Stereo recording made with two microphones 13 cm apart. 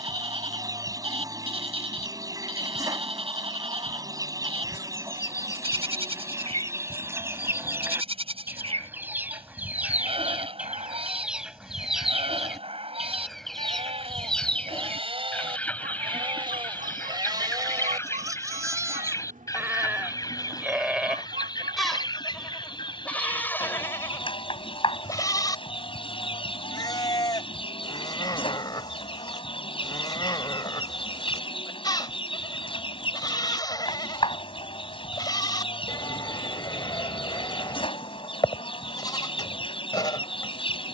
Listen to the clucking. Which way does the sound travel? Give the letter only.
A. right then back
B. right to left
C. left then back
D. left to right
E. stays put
B.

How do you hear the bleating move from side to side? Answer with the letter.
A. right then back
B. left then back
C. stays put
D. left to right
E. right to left
E.